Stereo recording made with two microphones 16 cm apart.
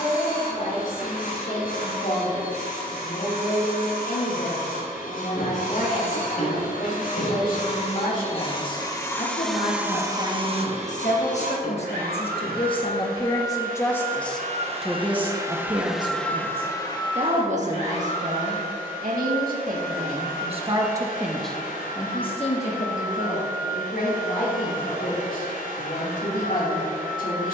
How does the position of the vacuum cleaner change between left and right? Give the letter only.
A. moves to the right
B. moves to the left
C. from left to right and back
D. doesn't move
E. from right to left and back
C.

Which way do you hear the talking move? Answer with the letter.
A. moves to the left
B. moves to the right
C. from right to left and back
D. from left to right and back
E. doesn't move
D.